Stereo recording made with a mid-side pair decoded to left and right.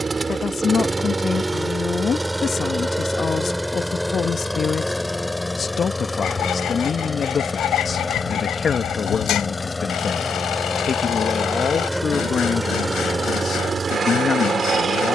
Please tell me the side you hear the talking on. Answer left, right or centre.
left.